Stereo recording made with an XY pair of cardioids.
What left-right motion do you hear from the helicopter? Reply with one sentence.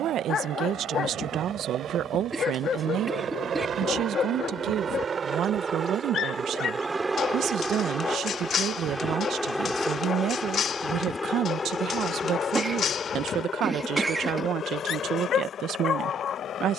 You can hear the helicopter move from right to left.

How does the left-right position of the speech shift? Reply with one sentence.
In this clip you hear the speech stay in one place.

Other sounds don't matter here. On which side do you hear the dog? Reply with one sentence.
You can hear the dog on the left.